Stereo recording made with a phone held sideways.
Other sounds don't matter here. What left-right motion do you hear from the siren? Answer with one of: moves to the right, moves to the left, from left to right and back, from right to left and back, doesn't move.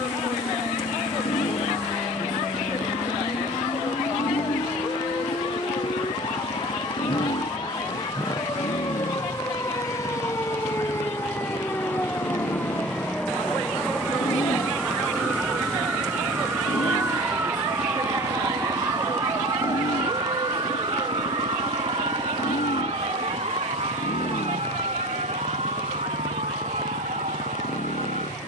moves to the right.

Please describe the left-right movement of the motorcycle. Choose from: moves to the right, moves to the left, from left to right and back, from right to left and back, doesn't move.
doesn't move.